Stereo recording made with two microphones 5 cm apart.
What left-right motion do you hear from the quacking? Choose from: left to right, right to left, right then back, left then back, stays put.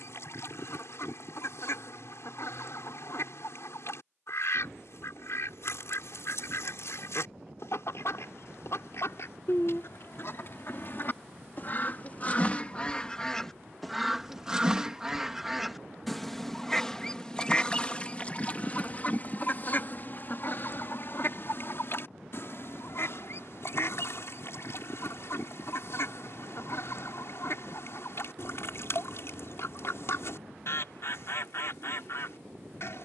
right then back.